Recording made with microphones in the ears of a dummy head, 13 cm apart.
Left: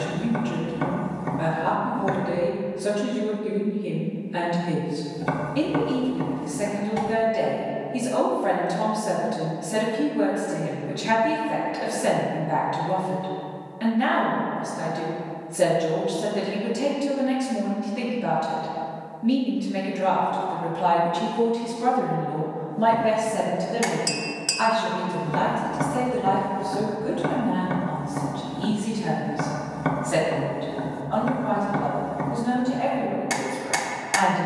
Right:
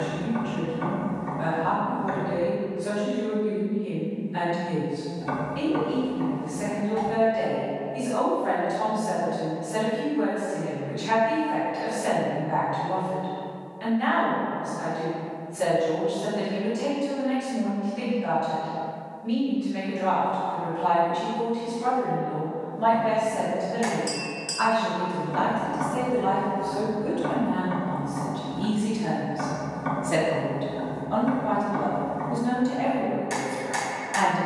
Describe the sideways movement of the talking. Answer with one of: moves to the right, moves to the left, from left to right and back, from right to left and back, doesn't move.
moves to the right.